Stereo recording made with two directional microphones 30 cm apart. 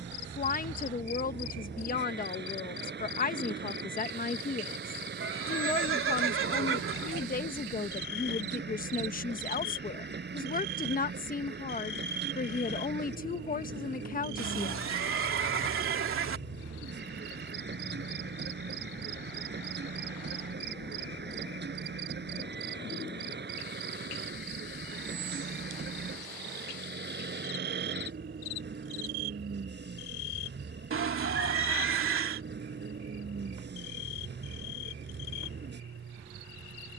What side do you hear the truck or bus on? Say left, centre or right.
right.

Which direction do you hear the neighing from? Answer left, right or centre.
right.